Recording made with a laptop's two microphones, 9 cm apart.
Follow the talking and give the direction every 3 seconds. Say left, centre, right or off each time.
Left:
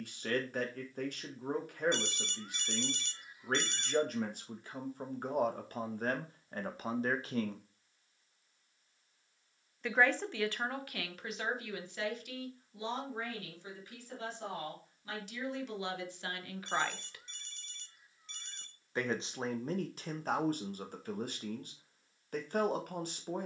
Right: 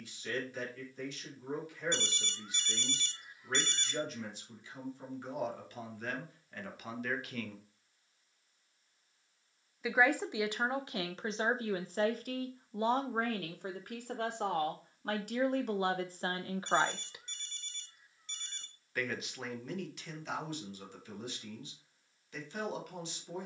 left, left, left, right, right, right, left, left.